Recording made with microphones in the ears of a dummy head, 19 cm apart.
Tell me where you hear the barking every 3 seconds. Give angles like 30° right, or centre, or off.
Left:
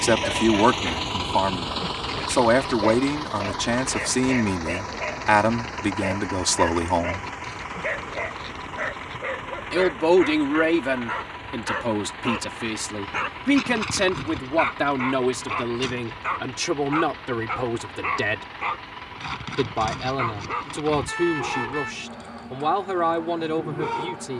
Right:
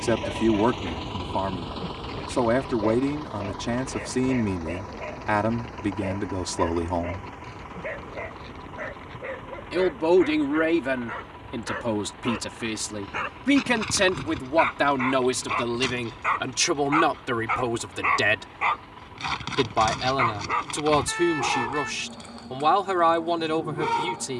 40° left, 40° left, 40° left, 30° left, 10° left, 20° right, 20° right, 20° right.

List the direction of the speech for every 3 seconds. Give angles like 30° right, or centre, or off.
40° left, 40° left, 40° left, 10° left, 10° right, 20° right, 30° right, 30° right.